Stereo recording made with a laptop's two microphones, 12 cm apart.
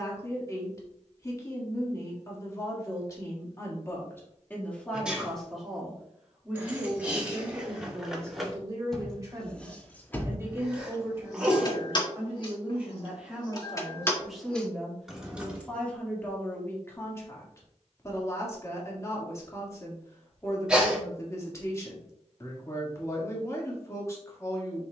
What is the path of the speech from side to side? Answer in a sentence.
In this clip you hear the speech go right and come back.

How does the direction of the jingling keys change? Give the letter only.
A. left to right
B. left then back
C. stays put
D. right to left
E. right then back
B.